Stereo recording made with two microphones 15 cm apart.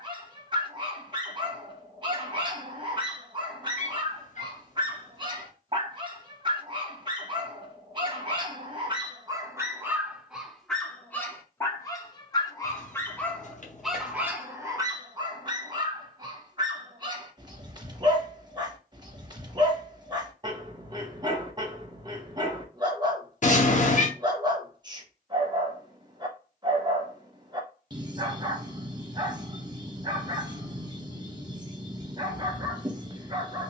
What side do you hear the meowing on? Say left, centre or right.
left.